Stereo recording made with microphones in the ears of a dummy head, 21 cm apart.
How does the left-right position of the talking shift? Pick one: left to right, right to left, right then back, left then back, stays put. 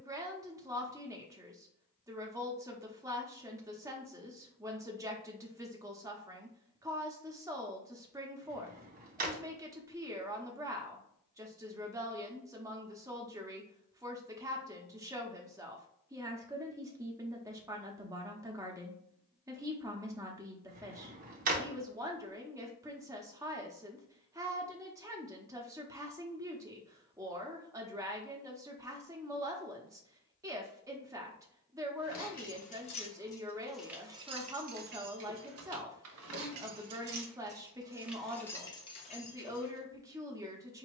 stays put.